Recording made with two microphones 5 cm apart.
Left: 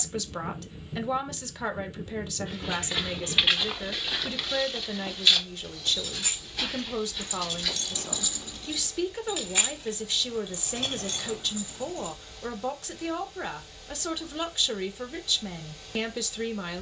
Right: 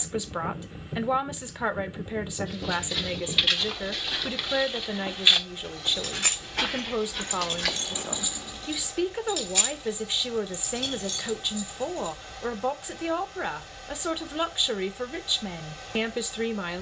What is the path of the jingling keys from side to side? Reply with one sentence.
You can hear the jingling keys move to the left.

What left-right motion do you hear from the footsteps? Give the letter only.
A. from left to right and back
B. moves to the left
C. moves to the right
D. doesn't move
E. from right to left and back
C.